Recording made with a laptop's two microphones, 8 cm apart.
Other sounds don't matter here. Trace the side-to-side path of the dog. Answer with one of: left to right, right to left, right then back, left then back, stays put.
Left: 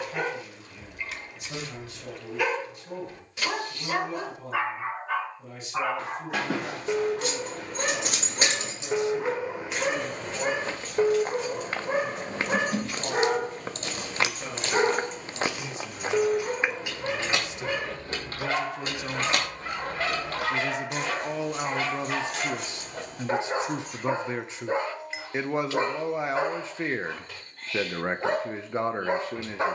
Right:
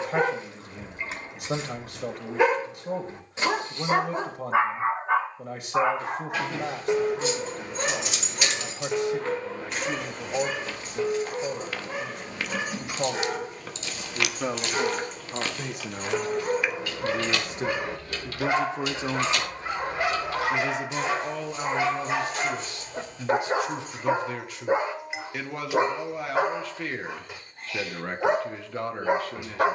left then back.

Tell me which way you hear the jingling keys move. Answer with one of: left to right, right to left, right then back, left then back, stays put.
right then back.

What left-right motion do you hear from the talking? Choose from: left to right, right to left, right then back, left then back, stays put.
right to left.